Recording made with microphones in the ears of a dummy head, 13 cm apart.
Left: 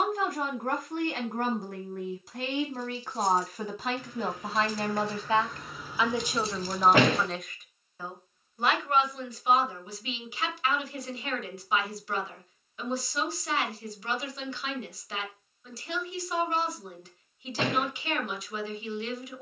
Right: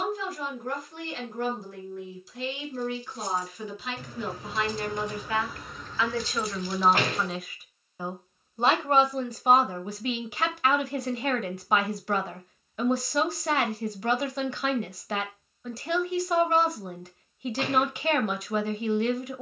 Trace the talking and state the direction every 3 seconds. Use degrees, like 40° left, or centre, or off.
40° left, 30° left, centre, 40° right, 40° right, 40° right, 40° right.